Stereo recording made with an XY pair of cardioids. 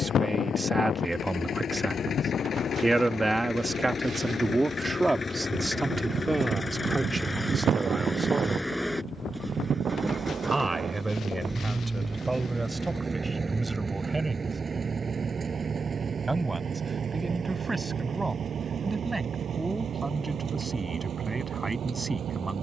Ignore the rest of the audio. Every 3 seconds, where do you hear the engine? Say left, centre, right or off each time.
left, left, centre, centre, right, right, right, right.